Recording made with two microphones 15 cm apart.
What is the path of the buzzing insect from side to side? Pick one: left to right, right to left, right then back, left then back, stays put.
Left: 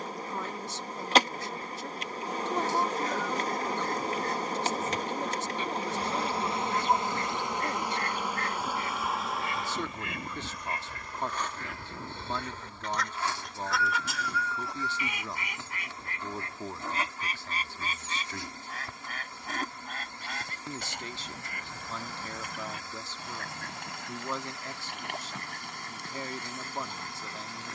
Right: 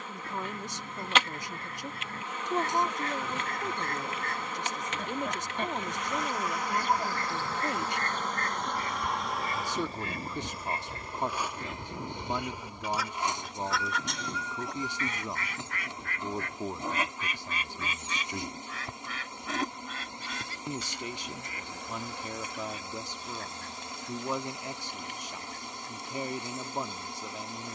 left to right.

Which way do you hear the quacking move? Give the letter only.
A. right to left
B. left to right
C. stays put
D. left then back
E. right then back
A.